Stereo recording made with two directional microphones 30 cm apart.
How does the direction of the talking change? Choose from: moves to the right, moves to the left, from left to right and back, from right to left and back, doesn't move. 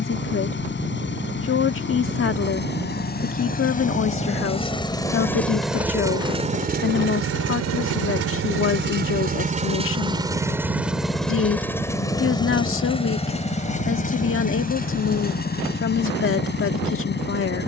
doesn't move.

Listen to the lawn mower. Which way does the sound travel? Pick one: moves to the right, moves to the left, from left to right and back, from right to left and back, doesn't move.
from left to right and back.